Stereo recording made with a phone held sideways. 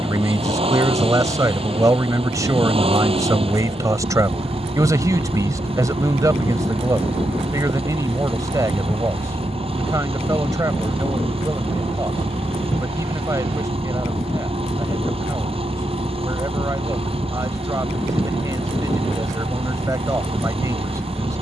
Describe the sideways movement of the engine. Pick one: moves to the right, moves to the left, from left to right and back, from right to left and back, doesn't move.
doesn't move.